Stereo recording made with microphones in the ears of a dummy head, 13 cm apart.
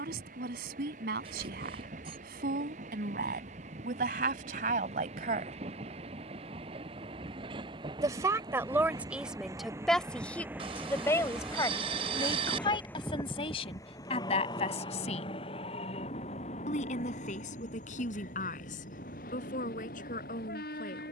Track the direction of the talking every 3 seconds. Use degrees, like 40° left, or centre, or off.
70° right, 60° right, 20° right, 10° left, 40° left, 50° left, 60° left.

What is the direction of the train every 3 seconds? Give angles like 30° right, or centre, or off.
60° right, 50° right, 30° right, 10° right, 20° left, 40° left, 60° left.